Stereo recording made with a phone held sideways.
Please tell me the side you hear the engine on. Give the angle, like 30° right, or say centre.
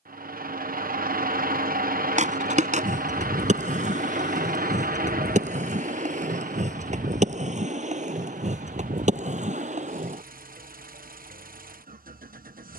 60° right.